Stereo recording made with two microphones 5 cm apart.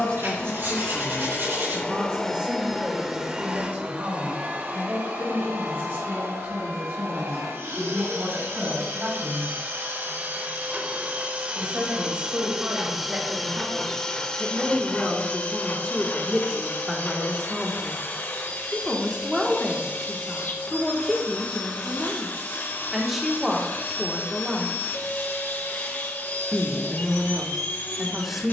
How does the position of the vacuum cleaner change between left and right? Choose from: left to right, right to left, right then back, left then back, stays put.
right then back.